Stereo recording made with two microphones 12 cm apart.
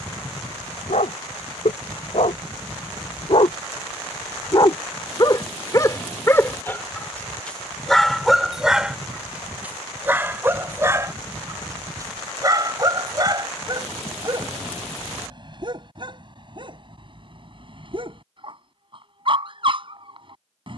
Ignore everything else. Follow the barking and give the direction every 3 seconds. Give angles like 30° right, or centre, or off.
70° left, 40° left, centre, 20° right, 40° right, 40° right, 50° right.